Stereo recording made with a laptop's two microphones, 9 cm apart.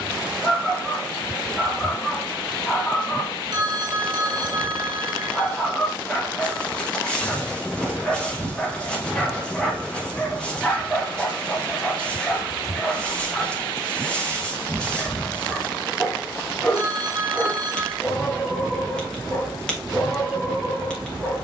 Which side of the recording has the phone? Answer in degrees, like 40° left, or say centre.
50° right.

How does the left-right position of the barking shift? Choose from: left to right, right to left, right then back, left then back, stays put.
stays put.